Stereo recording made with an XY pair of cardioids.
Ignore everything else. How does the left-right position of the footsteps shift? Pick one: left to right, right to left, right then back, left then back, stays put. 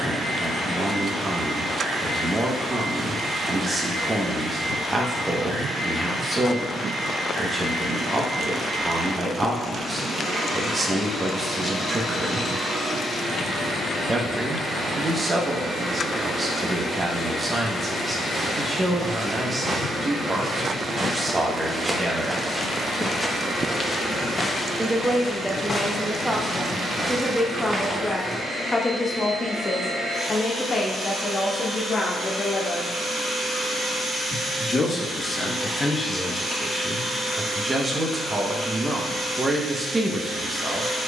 left then back.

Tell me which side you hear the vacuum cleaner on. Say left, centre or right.
right.